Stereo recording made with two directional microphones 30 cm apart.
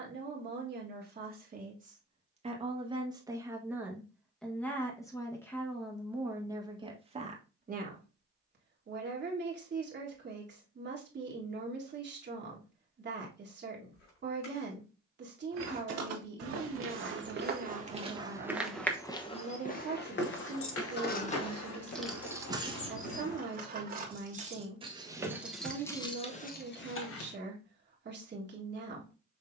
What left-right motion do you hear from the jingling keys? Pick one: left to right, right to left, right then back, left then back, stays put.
right then back.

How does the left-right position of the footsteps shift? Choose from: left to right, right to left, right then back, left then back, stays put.
right to left.